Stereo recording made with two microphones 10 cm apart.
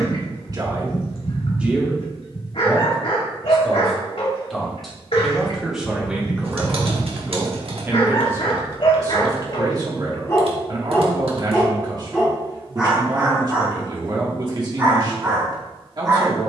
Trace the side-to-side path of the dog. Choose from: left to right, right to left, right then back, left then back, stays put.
left to right.